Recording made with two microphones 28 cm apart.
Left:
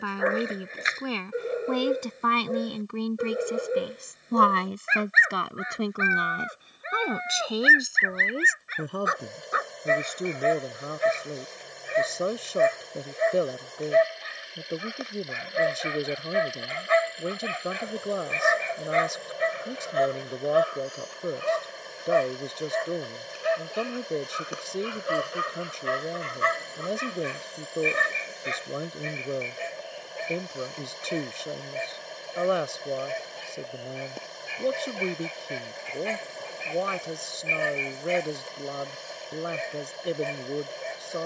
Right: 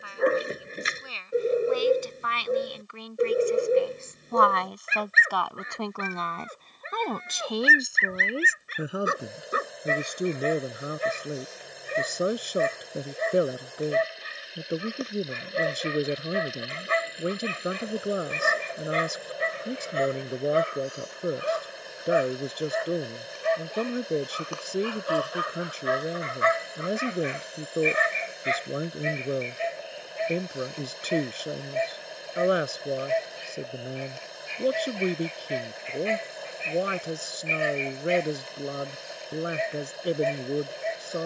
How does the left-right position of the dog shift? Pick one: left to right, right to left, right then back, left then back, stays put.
right to left.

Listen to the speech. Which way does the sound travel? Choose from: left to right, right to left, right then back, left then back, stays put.
left to right.